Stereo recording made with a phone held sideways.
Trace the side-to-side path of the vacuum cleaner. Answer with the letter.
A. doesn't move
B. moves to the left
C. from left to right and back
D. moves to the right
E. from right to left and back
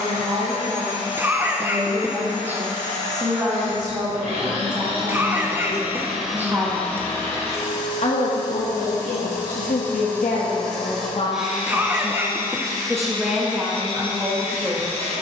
E.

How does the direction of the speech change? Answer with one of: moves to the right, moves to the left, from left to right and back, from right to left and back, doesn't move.
from right to left and back.